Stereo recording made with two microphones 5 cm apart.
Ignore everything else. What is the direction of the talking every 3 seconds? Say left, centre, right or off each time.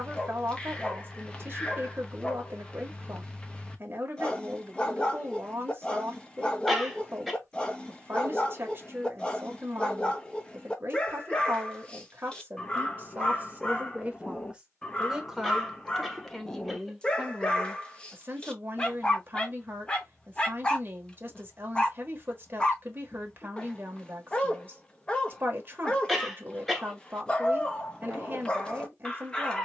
right, right, right, right, right, centre, right, right, right, right.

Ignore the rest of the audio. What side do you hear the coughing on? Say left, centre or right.
centre.